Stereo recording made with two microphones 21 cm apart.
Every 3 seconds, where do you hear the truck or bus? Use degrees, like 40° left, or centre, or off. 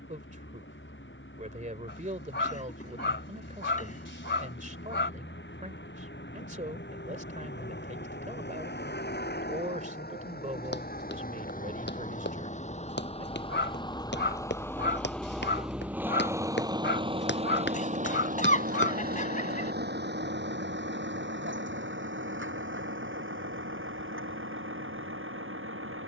70° left, 70° left, 60° left, 50° left, 20° left, 20° right, 50° right, 70° right, 70° right.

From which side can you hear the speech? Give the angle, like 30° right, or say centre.
40° right.